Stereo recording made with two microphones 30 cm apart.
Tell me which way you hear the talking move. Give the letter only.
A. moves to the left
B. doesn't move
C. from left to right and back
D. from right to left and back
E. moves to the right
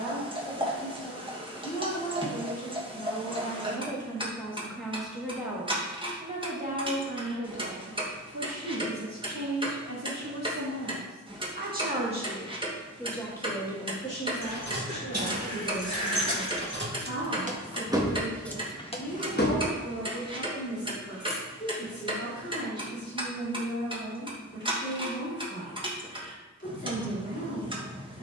C.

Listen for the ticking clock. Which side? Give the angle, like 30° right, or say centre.
20° right.